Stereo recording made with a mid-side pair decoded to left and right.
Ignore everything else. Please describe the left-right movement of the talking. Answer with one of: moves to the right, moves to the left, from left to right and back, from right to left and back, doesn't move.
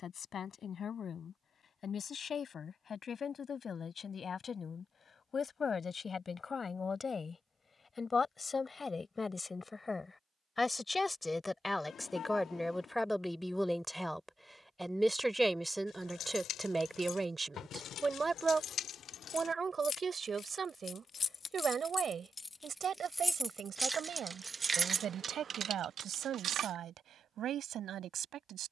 moves to the right.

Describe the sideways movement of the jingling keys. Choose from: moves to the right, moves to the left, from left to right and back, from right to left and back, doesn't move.
moves to the right.